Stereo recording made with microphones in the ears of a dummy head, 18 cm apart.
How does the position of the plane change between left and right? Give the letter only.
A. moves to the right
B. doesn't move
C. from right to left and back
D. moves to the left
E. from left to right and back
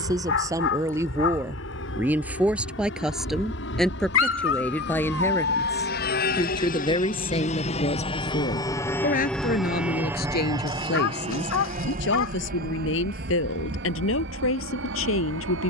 A.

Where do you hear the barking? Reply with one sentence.
In this clip you hear the barking on the left.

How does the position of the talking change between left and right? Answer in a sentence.
In this clip you hear the talking move from right to left.